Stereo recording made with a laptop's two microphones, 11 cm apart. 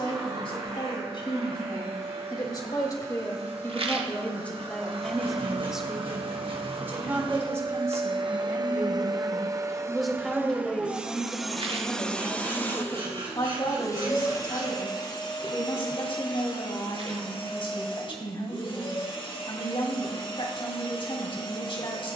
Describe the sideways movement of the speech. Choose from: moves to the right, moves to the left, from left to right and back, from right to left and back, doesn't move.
from left to right and back.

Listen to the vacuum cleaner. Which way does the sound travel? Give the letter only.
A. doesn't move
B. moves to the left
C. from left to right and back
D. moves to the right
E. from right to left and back
B.